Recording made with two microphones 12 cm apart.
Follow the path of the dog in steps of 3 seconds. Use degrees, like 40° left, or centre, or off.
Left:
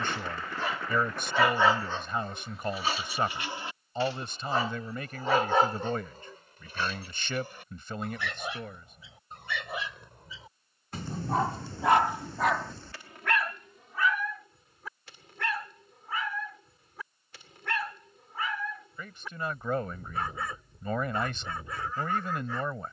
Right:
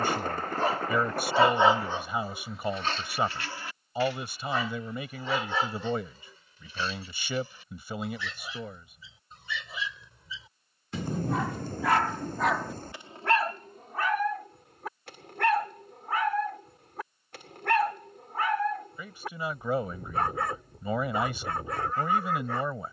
20° right, 30° left, 60° left, 50° left, 30° right, 60° right, 60° right, 60° right.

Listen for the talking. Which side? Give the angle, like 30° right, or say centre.
10° right.